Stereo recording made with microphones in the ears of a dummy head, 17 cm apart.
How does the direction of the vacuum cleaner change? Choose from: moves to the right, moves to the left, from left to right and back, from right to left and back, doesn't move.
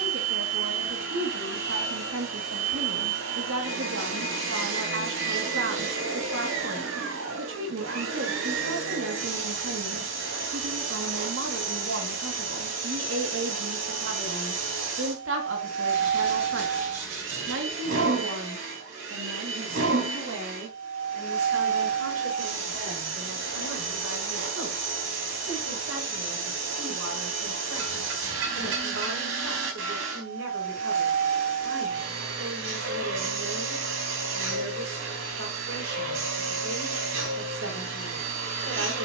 doesn't move.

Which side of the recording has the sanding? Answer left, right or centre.
right.